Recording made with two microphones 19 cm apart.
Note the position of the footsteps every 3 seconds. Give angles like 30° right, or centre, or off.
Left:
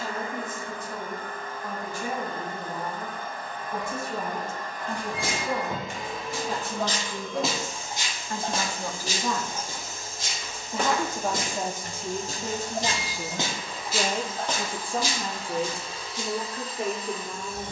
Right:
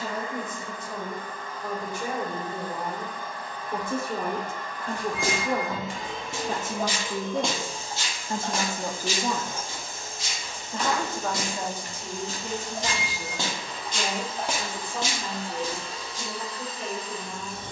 off, 50° right, centre, 50° left, 20° left, 40° right.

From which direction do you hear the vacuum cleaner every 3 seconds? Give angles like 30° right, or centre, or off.
60° left, 40° left, 30° right, 70° right, 70° right, 70° right.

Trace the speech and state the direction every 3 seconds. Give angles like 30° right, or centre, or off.
70° right, 60° right, 40° right, 10° left, 40° left, 60° left.